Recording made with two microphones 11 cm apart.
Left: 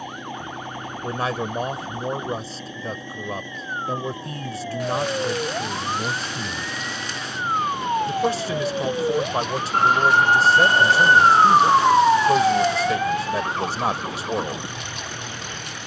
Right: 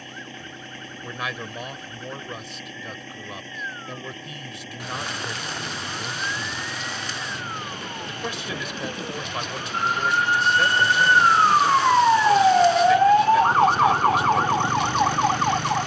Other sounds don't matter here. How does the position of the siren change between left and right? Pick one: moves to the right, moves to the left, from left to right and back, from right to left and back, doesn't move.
moves to the right.